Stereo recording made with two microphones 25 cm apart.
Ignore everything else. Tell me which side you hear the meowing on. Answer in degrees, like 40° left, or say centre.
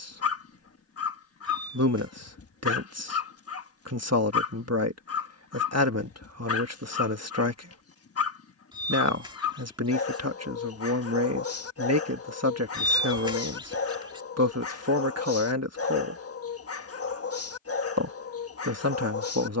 20° right.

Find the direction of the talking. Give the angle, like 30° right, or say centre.
80° right.